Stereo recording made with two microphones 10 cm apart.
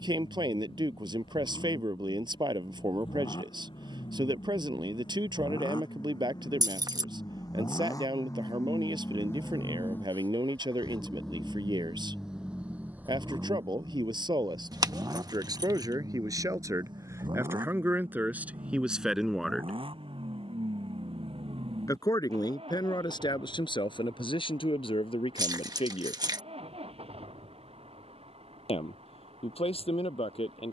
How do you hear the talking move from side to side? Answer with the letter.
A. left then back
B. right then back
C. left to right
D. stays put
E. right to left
E.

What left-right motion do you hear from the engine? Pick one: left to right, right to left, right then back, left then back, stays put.
left to right.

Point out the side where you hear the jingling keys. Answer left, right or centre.
right.